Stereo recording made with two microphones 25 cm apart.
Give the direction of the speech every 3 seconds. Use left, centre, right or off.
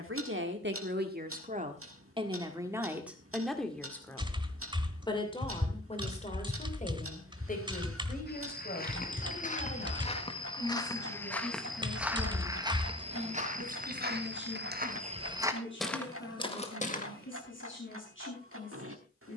right, centre, left, left, left, left, left.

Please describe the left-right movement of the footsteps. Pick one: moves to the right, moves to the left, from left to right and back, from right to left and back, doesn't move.
from left to right and back.